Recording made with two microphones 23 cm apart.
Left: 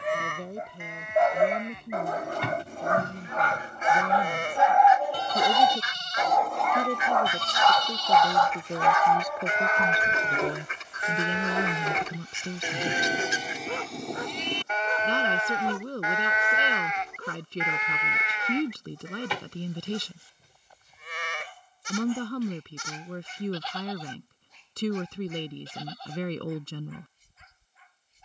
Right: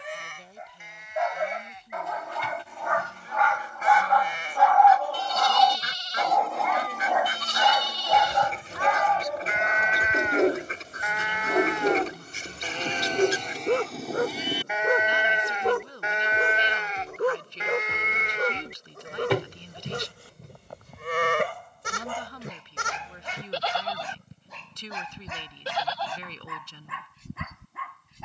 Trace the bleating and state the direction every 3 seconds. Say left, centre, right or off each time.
left, left, left, left, centre, right, right, right, right, right.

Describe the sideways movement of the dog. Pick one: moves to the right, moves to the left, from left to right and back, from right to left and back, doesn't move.
moves to the right.